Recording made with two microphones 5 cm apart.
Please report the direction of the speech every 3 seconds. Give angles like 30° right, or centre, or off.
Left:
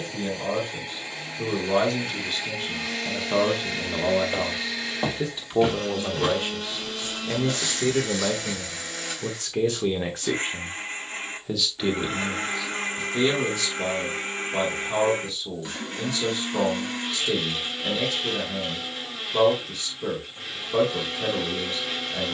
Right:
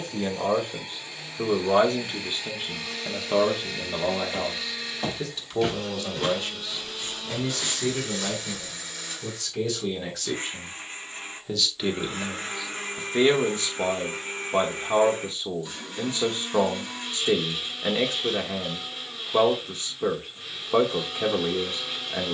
30° right, centre, 40° left, 20° left, 30° right, 40° right, 40° right, 40° right.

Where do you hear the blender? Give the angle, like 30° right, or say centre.
80° left.